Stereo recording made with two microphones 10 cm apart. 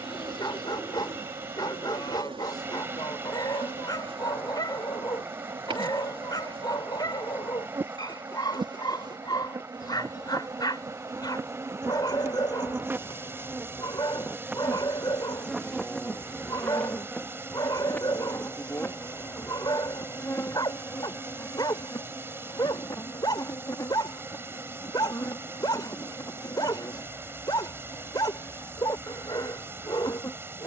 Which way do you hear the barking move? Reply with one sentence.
You can hear the barking stay put.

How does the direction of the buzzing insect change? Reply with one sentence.
In this clip you hear the buzzing insect move to the left.